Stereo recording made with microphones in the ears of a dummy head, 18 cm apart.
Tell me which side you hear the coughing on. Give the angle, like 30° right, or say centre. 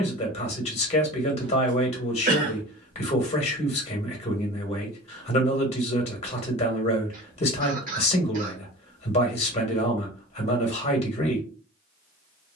40° right.